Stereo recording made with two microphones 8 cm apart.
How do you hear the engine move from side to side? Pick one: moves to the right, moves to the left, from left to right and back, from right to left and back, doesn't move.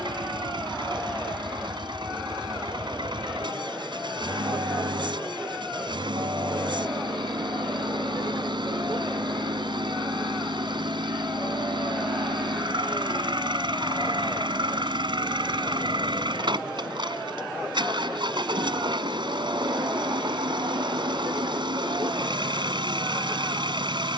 doesn't move.